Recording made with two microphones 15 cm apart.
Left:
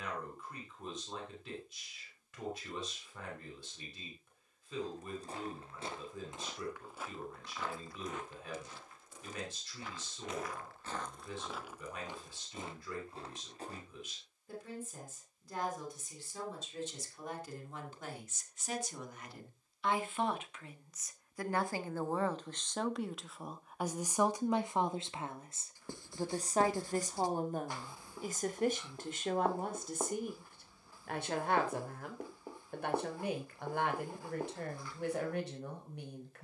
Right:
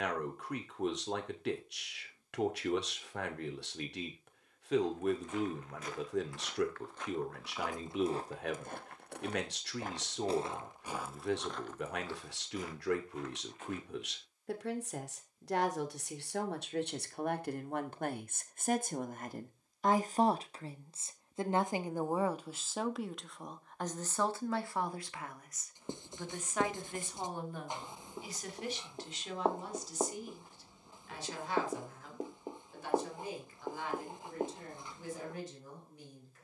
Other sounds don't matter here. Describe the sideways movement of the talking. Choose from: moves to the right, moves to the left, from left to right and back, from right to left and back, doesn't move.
moves to the left.